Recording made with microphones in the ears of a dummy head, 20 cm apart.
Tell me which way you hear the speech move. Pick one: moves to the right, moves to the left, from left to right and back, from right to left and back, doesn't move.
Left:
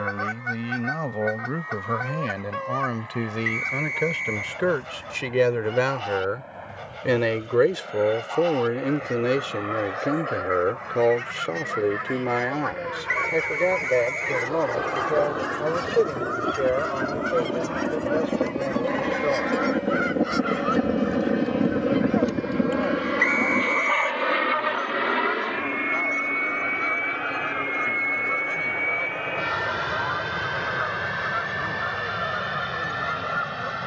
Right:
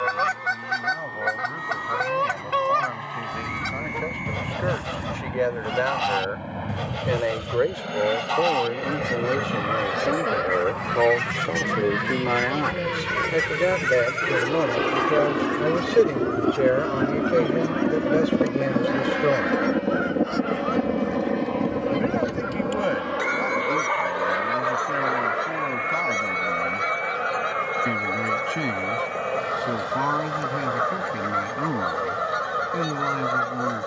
moves to the right.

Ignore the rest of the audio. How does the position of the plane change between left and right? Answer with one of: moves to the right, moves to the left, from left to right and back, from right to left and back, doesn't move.
moves to the left.